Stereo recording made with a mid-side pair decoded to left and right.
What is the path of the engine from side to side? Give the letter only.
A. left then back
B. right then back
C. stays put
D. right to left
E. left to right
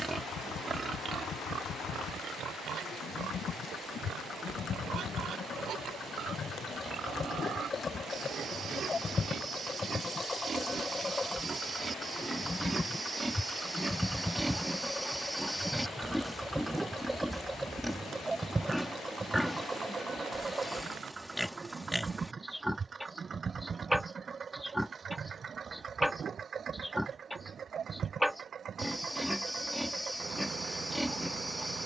E.